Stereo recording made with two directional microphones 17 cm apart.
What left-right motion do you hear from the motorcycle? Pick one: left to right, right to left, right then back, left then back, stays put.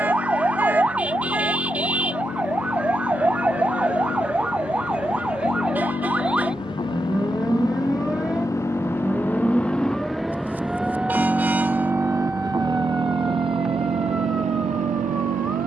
left to right.